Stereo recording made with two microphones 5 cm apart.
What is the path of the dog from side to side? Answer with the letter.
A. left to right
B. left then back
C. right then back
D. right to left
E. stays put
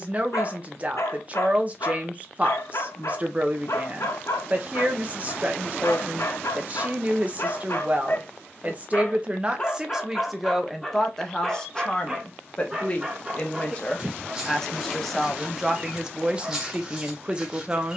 A.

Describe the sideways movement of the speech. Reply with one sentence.
You can hear the speech move from right to left and back again.